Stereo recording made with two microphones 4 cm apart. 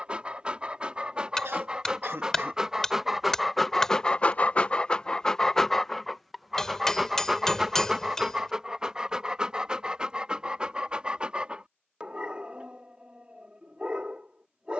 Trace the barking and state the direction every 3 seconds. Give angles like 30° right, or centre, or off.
20° right, 10° left, 10° right, 20° right, 30° right.